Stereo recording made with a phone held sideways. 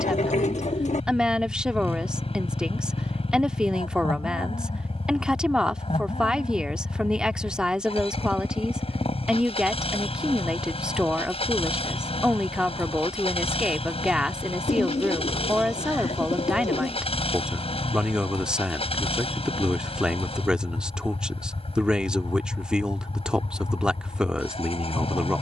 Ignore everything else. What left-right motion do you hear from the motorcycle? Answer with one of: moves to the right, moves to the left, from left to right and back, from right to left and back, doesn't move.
doesn't move.